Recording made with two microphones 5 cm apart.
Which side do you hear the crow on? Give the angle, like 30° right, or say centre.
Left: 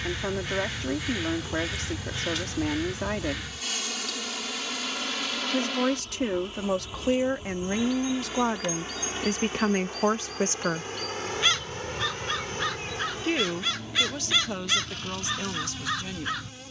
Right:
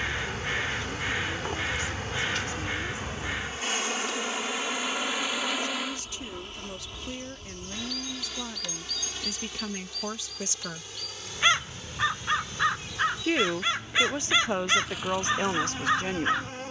20° right.